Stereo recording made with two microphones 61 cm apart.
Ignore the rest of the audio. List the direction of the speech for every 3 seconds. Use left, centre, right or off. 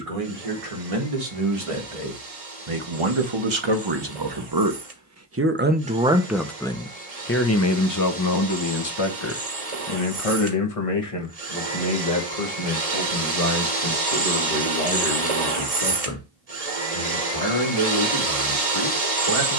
right, right, left, left, left, left, left.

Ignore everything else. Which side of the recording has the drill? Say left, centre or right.
right.